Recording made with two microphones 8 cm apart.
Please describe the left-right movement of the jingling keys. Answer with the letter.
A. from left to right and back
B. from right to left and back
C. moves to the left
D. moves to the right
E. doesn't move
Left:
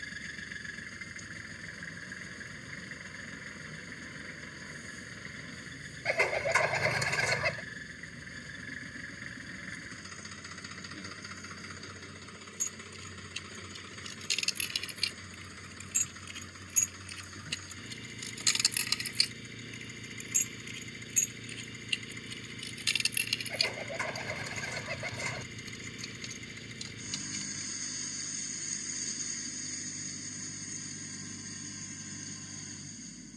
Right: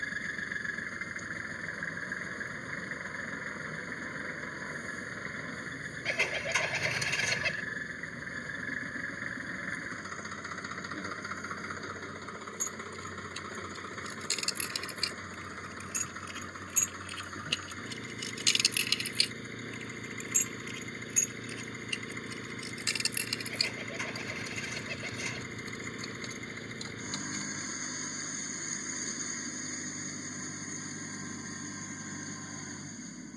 B.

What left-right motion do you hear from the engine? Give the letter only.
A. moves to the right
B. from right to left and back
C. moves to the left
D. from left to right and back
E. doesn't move
E.